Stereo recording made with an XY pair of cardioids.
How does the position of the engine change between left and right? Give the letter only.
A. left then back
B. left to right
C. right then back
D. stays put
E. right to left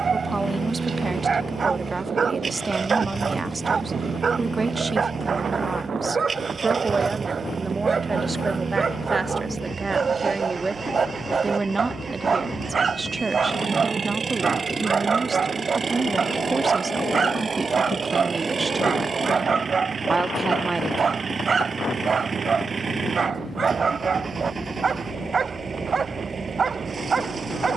D.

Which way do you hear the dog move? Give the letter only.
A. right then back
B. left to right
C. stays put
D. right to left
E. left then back
C.